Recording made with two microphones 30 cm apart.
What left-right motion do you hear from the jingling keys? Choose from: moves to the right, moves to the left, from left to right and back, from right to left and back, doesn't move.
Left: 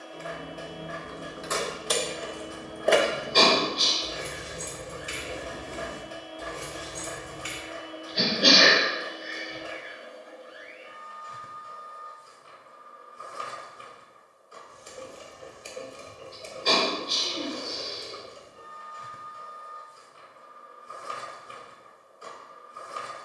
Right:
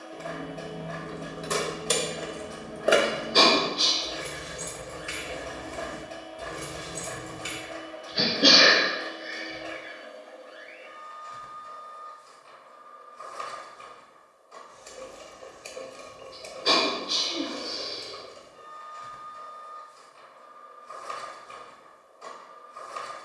from right to left and back.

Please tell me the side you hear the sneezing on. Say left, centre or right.
centre.